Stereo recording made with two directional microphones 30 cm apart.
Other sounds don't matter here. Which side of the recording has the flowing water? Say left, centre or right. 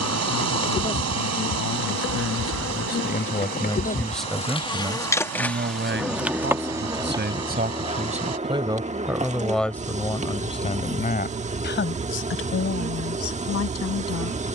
right.